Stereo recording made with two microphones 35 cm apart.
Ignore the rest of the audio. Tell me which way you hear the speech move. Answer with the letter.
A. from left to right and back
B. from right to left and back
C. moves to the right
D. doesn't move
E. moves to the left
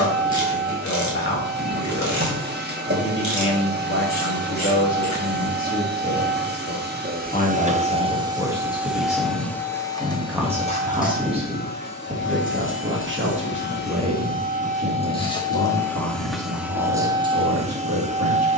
C.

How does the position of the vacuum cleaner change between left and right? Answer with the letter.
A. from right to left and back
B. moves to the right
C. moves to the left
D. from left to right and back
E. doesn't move
A.